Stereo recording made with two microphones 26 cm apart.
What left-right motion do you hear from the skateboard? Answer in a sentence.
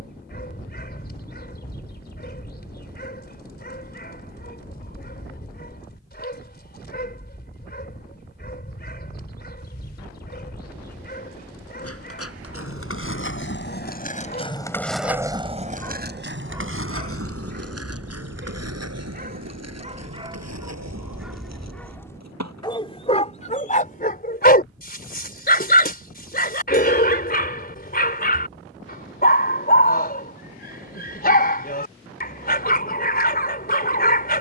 In this clip you hear the skateboard move to the right.